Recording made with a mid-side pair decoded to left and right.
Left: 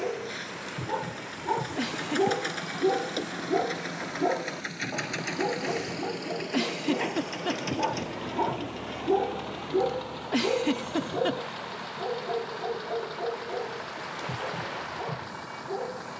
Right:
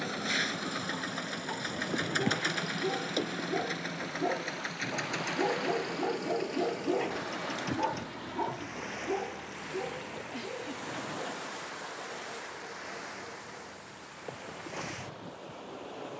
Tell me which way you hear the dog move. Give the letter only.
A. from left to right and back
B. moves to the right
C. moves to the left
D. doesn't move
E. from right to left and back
A.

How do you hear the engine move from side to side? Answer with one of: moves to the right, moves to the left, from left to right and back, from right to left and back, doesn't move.
moves to the left.